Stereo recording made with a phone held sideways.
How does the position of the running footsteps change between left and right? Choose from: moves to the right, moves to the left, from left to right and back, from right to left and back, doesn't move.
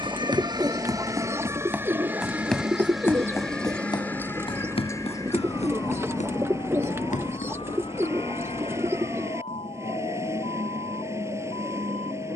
moves to the left.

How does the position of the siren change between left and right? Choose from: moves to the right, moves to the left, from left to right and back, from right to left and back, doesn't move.
moves to the left.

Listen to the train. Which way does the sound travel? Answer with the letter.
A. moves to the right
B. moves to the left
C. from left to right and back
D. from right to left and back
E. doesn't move
E.